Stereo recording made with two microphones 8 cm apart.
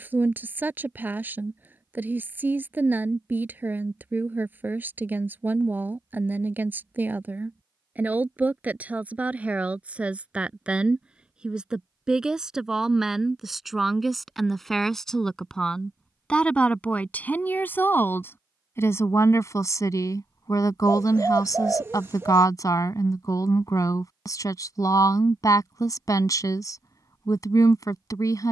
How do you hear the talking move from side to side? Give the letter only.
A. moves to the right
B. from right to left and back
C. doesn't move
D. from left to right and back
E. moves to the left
E.